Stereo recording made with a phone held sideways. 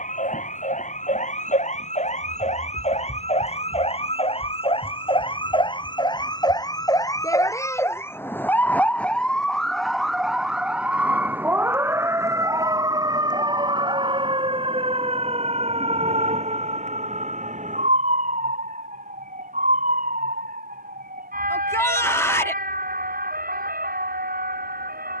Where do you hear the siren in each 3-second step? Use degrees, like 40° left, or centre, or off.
50° left, 40° left, 20° left, centre, 30° right, 40° right, 50° right, 60° right, 70° right.